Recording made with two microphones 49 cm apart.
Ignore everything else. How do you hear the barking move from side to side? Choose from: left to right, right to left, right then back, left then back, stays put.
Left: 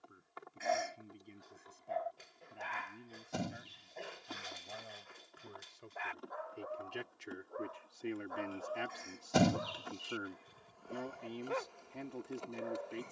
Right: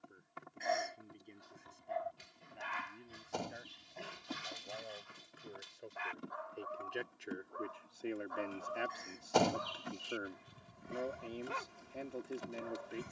stays put.